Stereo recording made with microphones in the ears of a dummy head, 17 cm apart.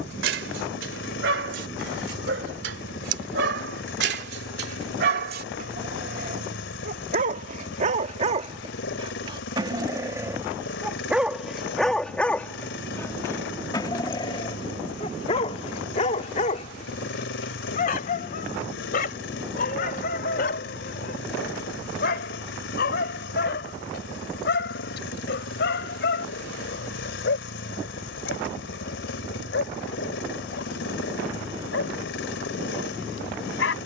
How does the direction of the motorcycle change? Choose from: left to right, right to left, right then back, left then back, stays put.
stays put.